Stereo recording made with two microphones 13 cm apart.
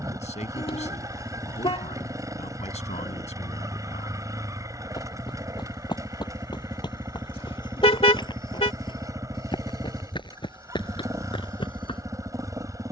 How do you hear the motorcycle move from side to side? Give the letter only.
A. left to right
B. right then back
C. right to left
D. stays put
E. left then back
D.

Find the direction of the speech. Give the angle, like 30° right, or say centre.
60° left.